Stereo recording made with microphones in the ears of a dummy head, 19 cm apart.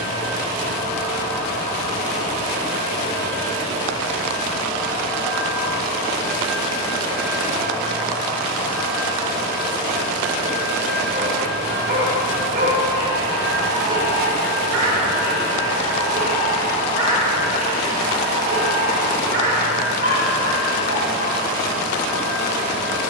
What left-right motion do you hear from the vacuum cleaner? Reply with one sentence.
You can hear the vacuum cleaner go from the left side to the right.